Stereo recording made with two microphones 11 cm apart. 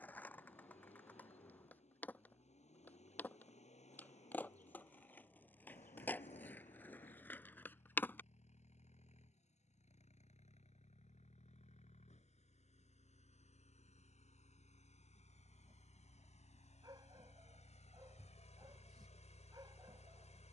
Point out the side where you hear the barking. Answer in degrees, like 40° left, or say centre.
40° right.